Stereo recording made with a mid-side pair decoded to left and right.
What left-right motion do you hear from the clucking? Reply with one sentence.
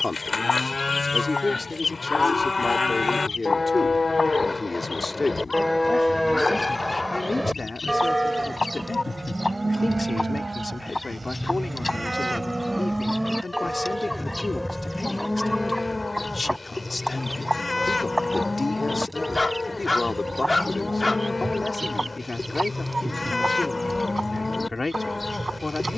In this clip you hear the clucking move from left to right.